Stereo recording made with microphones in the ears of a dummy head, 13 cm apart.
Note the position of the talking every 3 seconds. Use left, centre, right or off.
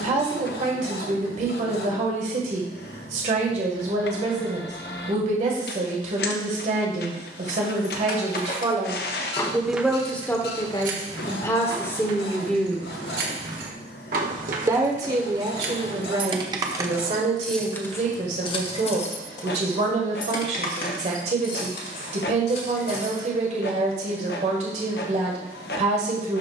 right, right, right, centre, centre, right, right, right, right.